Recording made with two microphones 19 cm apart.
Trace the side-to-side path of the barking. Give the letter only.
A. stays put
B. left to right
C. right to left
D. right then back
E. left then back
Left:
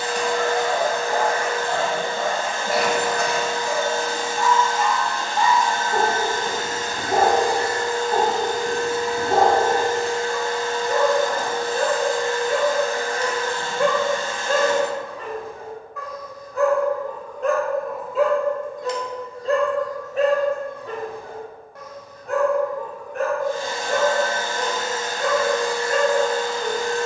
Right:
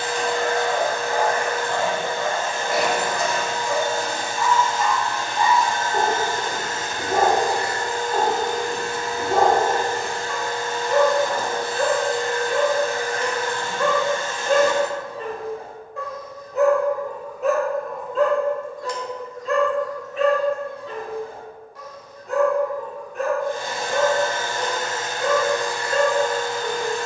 D.